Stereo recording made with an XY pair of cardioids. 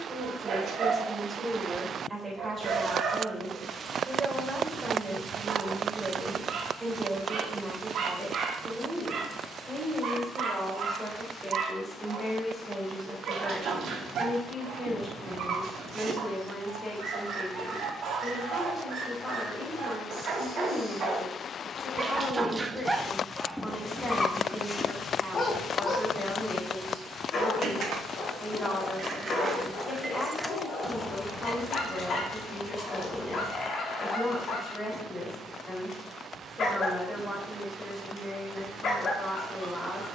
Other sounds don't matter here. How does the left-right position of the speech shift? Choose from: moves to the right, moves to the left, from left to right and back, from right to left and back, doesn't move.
moves to the left.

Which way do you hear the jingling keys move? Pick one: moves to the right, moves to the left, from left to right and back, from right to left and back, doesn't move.
moves to the left.